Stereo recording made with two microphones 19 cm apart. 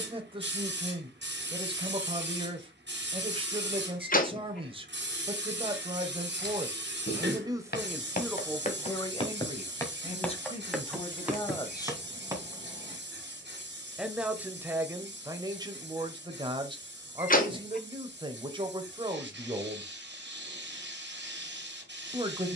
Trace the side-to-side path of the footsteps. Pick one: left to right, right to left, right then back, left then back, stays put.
left to right.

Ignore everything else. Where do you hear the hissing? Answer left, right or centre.
right.